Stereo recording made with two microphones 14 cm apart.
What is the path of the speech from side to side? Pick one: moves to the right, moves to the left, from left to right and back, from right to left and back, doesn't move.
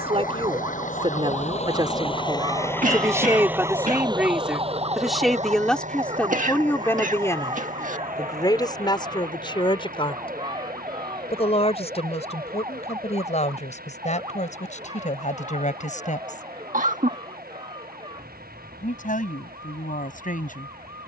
moves to the left.